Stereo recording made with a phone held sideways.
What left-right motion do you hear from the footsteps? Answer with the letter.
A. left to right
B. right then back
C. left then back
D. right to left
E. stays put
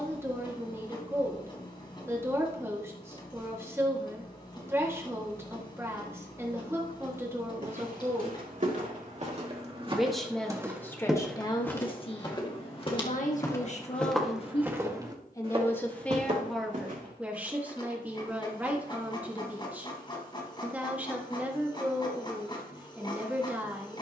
C.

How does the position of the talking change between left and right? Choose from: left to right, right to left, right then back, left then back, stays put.
left then back.